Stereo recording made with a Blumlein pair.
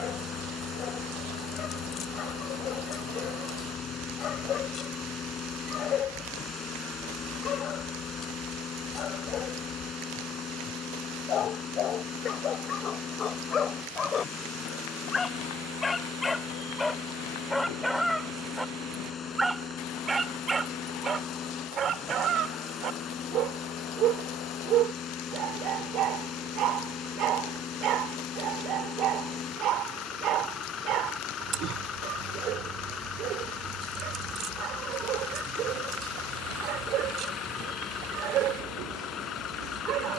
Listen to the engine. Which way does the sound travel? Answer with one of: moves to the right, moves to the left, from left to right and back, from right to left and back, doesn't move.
doesn't move.